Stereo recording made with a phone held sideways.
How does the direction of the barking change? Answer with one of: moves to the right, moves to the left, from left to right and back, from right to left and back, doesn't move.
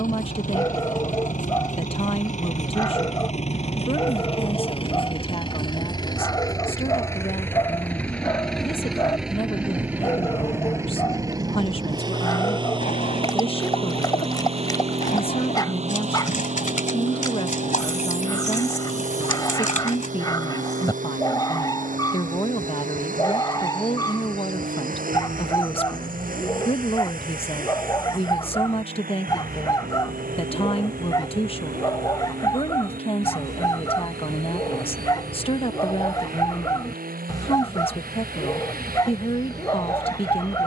doesn't move.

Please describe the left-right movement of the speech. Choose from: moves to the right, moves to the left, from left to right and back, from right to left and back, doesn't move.
doesn't move.